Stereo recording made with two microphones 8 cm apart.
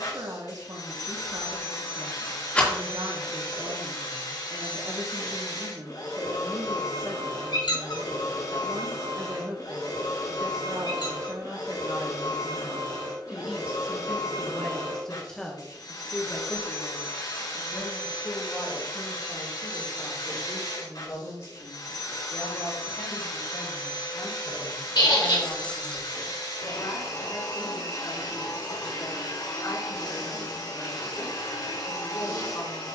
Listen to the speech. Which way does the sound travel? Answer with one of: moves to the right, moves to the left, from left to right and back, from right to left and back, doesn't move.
moves to the left.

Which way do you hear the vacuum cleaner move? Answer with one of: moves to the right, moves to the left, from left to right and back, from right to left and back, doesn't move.
doesn't move.